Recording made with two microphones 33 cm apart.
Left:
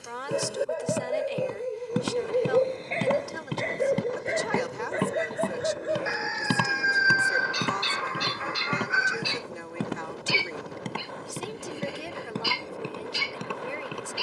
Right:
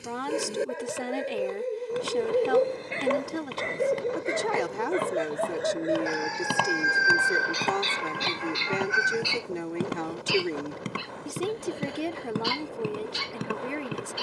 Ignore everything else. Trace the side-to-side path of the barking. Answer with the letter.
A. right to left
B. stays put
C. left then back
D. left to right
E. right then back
A.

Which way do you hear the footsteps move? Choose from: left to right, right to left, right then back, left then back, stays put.
left to right.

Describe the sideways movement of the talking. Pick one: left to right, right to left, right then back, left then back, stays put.
stays put.